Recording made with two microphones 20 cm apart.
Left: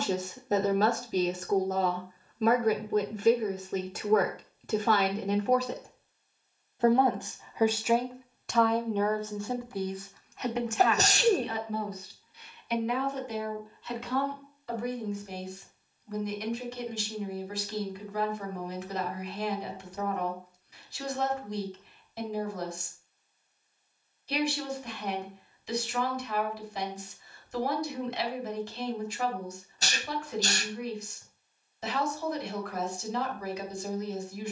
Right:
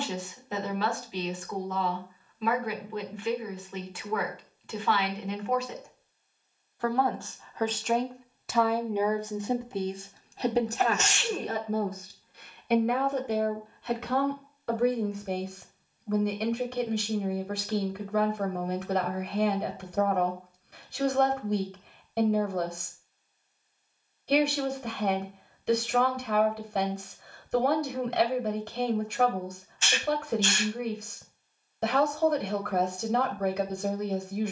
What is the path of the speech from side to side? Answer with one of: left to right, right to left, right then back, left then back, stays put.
left to right.